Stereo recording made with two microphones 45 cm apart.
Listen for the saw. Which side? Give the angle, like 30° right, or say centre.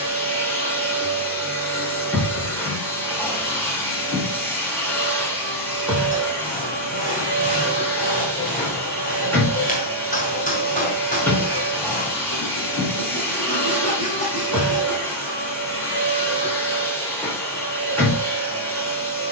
20° left.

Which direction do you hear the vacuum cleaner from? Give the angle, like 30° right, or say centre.
centre.